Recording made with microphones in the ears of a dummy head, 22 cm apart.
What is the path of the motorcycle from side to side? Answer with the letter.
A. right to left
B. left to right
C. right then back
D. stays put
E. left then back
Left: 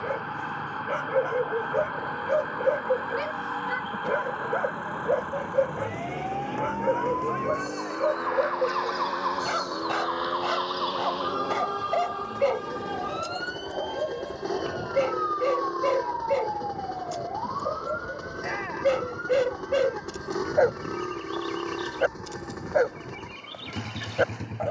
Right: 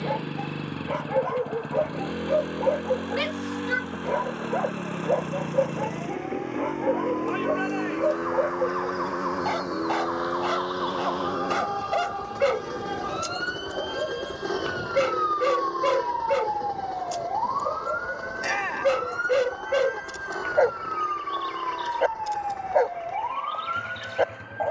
A.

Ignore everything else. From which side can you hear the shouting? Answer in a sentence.
You can hear the shouting on the right.